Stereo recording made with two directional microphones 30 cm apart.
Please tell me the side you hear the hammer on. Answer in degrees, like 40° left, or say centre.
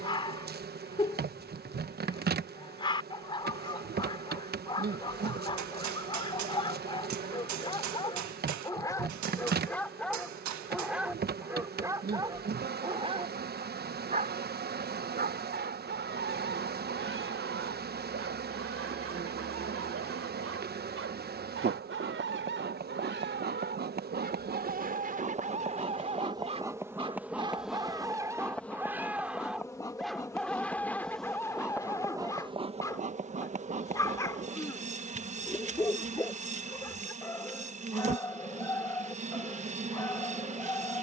70° right.